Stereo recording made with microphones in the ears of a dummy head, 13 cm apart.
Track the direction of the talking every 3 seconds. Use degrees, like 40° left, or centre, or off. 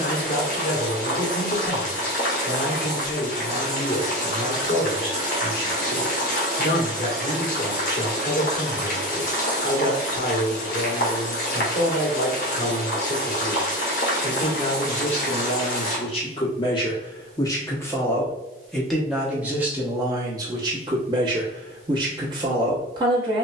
50° left, 50° left, 50° left, 50° left, 50° left, 30° left, 10° right, 30° right.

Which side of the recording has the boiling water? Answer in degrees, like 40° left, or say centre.
60° left.